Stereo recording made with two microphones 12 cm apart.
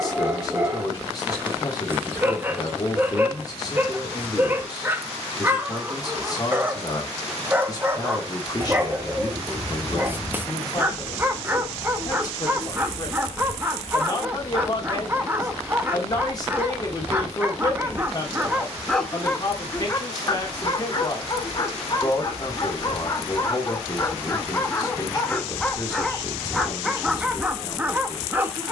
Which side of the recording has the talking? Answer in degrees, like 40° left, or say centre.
30° left.